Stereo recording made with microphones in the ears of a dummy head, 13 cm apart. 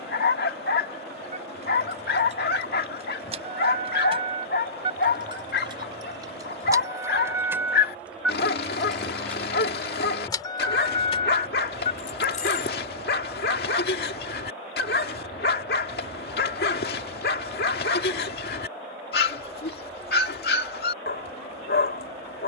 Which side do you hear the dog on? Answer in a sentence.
You can hear the dog on the left.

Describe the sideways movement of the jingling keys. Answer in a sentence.
In this clip you hear the jingling keys travel towards the left.